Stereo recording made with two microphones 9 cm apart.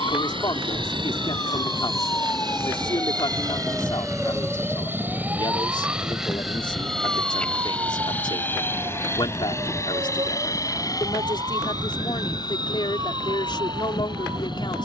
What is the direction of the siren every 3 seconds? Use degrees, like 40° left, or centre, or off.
40° left, 10° right, 40° right, 50° right, 50° right.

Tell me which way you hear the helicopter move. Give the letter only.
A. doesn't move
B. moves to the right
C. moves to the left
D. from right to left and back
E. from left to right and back
C.